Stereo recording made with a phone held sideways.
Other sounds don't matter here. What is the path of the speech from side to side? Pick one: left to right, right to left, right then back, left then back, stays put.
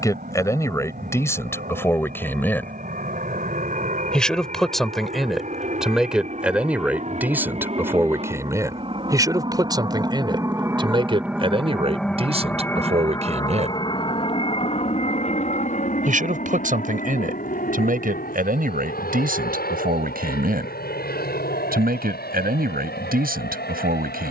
left to right.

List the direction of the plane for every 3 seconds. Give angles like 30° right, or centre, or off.
70° right, 60° right, 50° right, 20° right, 20° left, 50° left, 70° left, 70° left.